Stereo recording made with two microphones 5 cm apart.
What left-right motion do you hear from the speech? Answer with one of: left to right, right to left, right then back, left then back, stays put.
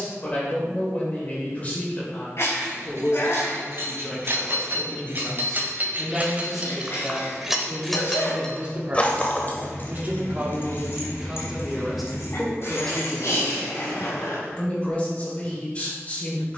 right then back.